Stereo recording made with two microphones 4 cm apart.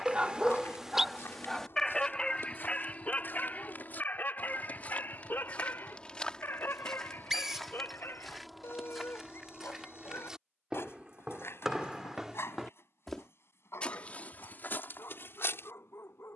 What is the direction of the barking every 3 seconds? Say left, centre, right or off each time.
centre, left, left, left, left, left.